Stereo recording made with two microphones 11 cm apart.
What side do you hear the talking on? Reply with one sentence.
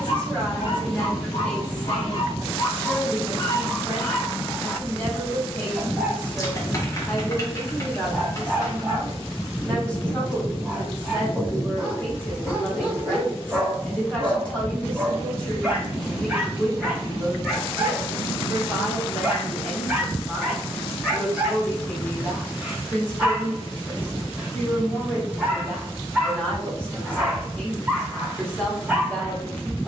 In this clip you hear the talking in the centre.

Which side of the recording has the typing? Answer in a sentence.
You can hear the typing on the left.